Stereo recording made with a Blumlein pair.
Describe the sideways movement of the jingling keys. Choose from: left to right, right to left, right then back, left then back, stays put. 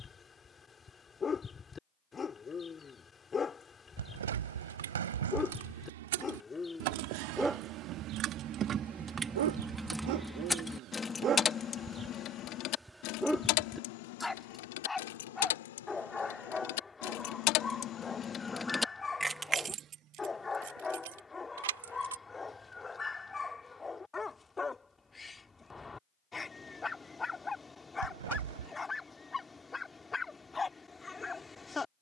left then back.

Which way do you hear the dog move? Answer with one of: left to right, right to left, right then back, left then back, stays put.
right then back.